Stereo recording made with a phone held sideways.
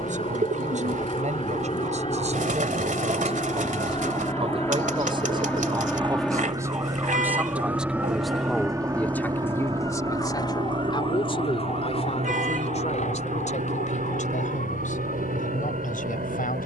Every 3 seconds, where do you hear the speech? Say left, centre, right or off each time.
right, right, centre, left, left, left.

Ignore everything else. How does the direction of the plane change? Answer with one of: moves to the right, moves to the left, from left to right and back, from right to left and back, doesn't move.
moves to the right.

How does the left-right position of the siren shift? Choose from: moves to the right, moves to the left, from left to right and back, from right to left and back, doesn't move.
moves to the left.